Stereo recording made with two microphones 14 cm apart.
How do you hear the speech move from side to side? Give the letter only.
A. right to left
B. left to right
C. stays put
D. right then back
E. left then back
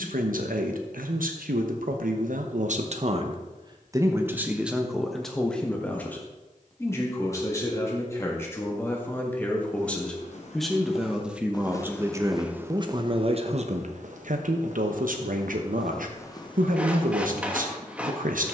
E.